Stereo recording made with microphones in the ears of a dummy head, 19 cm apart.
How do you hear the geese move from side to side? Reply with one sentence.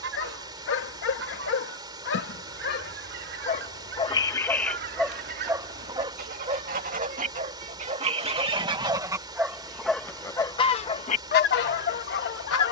In this clip you hear the geese go from the right side to the left.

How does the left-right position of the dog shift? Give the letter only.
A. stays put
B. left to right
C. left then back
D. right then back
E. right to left
D.